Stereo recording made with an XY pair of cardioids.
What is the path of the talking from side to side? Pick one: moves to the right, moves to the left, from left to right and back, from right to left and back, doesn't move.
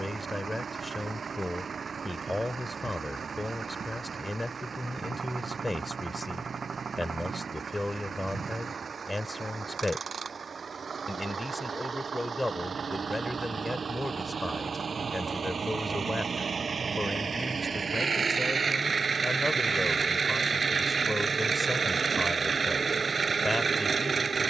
doesn't move.